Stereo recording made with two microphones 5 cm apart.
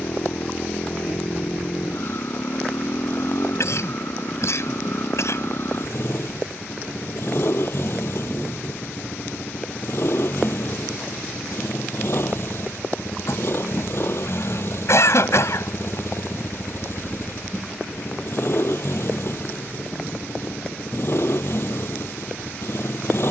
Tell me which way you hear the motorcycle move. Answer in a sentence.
In this clip you hear the motorcycle stay in one place.